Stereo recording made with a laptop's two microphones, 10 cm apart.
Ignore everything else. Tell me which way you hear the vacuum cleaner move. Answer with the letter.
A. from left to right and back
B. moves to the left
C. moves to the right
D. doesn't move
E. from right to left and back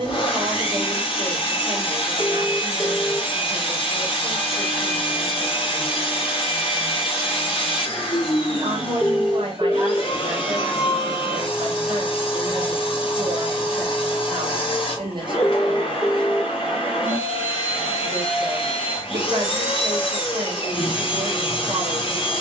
D.